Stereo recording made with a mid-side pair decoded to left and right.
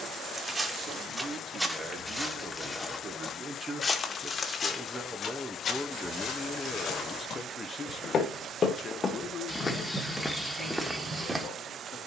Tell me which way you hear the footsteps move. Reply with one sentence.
In this clip you hear the footsteps go left and come back.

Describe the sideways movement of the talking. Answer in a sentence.
You can hear the talking travel towards the left.